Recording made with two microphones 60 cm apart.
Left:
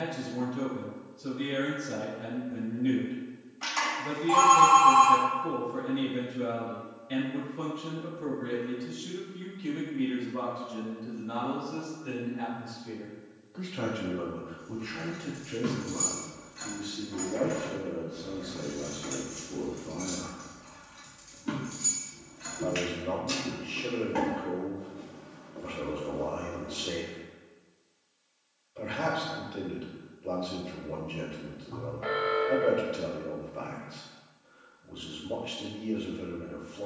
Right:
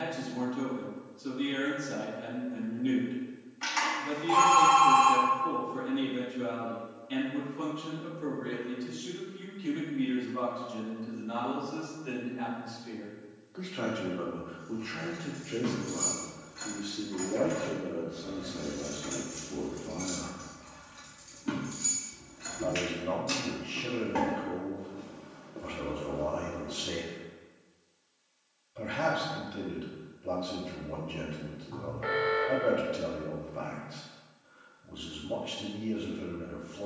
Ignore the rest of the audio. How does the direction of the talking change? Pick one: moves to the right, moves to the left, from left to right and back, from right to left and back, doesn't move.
moves to the right.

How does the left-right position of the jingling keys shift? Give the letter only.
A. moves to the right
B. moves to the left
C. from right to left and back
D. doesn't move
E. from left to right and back
E.